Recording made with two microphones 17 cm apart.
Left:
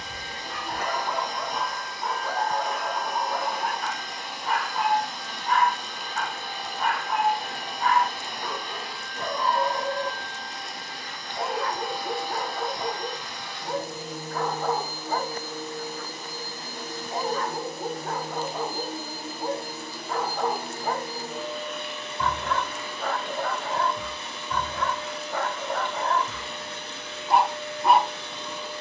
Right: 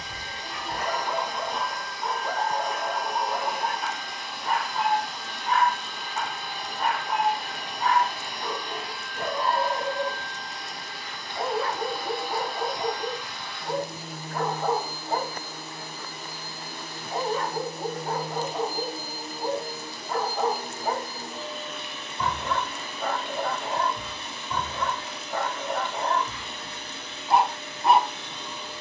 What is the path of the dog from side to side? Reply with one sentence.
In this clip you hear the dog stay put.